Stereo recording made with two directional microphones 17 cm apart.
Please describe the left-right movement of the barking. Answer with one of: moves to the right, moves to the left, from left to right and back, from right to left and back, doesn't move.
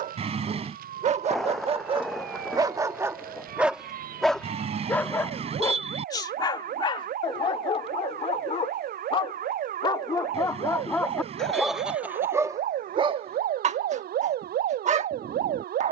from right to left and back.